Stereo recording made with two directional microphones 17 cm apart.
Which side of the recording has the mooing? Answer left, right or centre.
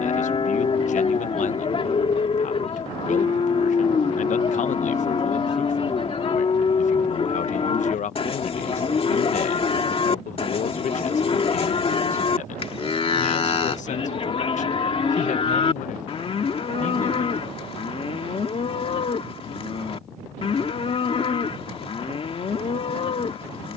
left.